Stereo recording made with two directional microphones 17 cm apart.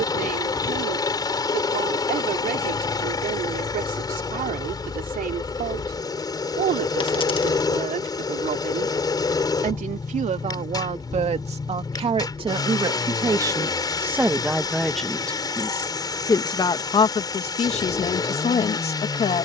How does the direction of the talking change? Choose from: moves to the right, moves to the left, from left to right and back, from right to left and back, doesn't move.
moves to the left.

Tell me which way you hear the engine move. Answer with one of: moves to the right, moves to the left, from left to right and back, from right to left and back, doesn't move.
doesn't move.